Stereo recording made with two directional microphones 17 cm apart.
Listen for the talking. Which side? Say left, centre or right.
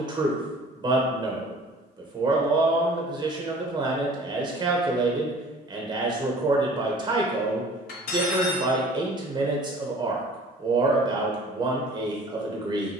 right.